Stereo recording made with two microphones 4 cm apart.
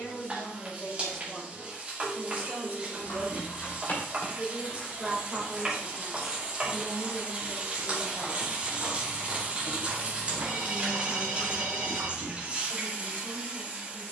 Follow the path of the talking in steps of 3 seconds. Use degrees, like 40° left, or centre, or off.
centre, 30° right, 20° left, 30° left, 30° left.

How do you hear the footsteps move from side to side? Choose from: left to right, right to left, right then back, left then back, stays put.
left to right.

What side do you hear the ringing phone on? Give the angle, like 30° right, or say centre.
centre.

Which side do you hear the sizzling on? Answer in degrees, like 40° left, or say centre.
30° right.